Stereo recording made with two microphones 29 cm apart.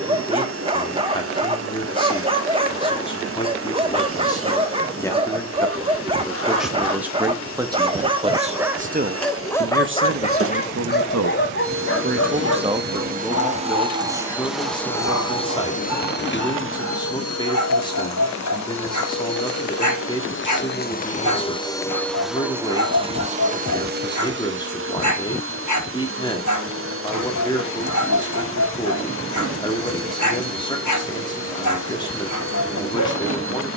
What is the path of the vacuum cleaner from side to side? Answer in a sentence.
You can hear the vacuum cleaner go left and come back.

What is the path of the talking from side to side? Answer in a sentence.
You can hear the talking move from left to right and back again.